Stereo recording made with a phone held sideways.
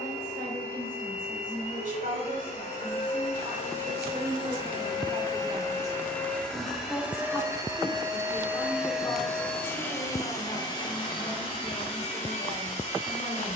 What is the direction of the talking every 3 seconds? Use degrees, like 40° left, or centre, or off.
60° right, 40° right, 10° left, 40° left, 50° left.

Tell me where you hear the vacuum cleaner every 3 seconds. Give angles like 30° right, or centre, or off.
50° left, 40° left, 10° right, 30° left, 50° left.